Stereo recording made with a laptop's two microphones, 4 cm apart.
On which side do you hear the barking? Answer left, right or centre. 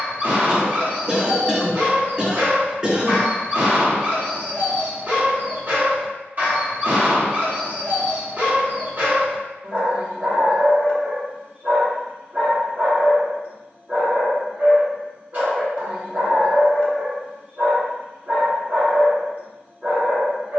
right.